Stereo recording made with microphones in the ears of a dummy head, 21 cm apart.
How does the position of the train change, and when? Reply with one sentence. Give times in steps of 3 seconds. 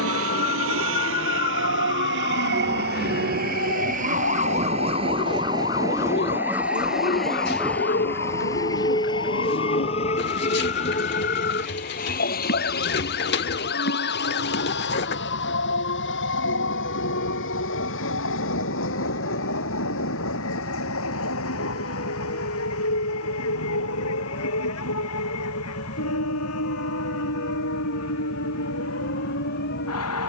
You can hear the train on the right from 0 s, in the centre from 6 s and on the left from 9 s.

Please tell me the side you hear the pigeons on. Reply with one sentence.
You can hear the pigeons on the left.